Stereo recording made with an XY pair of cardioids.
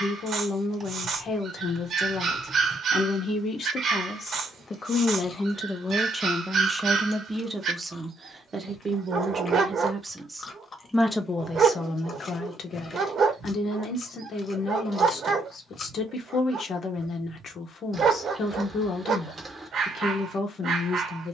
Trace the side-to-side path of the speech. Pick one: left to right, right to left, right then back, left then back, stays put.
right then back.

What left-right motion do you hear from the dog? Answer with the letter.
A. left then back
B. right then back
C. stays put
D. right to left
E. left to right
C.